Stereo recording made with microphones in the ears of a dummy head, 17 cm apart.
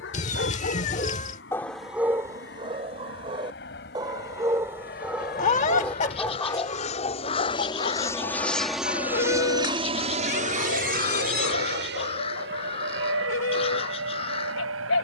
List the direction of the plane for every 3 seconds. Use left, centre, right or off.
left, left, left, right, right.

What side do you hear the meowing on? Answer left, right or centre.
left.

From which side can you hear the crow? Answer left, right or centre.
left.